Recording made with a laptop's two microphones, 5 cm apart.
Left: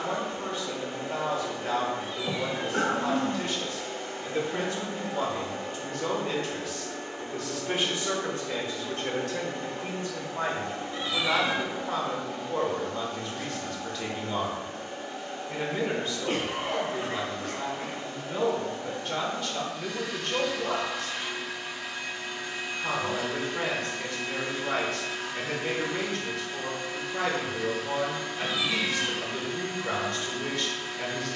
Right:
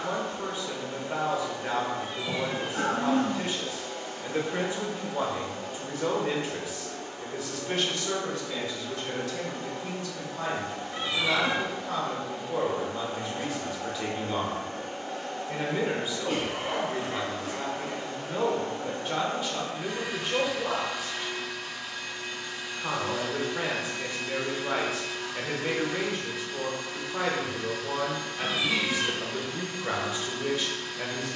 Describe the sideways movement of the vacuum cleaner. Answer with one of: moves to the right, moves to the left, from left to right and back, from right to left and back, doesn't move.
from left to right and back.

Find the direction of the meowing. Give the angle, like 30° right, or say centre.
30° right.